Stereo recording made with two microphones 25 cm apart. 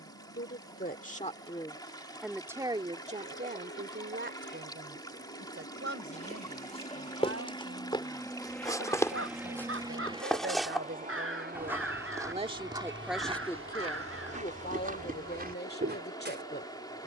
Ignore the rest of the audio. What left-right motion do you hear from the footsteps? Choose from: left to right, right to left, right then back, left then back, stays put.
left to right.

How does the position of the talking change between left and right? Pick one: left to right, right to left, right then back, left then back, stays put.
right then back.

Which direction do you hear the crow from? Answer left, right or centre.
right.